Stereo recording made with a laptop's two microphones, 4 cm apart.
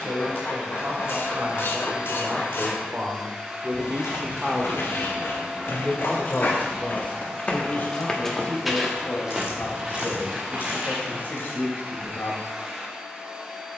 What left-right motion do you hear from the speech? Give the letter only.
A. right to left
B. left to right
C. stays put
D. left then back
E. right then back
A.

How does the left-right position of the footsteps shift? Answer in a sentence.
You can hear the footsteps move to the right.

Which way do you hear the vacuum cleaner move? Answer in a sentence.
In this clip you hear the vacuum cleaner stay put.